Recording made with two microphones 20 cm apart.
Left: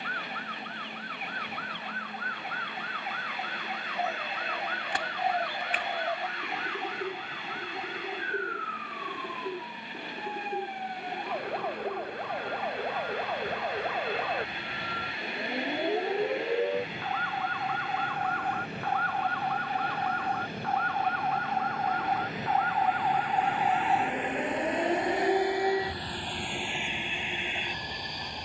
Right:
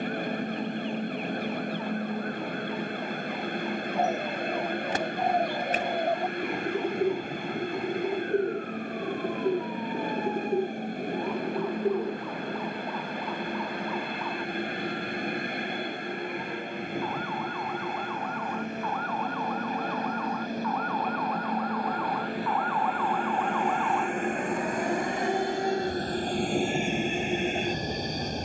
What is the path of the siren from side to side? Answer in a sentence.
You can hear the siren move to the right.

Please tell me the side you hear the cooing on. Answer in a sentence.
You can hear the cooing on the right.